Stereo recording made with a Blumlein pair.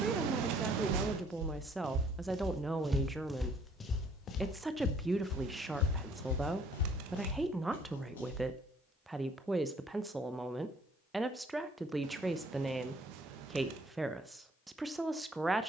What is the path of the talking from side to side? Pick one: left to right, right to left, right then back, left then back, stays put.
stays put.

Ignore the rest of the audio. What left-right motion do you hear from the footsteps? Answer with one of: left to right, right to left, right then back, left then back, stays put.
right to left.